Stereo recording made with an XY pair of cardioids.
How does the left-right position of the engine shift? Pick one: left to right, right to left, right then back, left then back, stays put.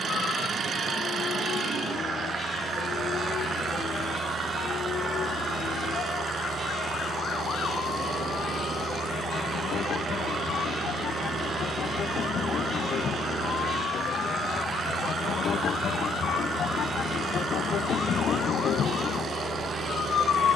stays put.